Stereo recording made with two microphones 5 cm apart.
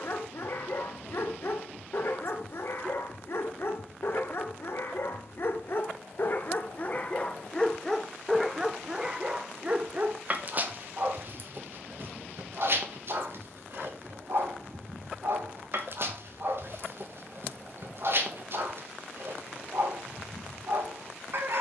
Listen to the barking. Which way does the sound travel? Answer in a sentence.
You can hear the barking travel towards the right.